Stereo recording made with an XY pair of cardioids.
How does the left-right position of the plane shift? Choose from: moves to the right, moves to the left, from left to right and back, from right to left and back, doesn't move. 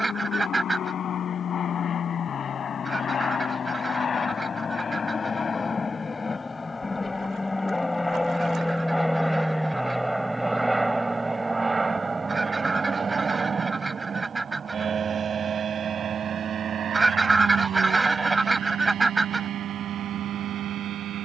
moves to the right.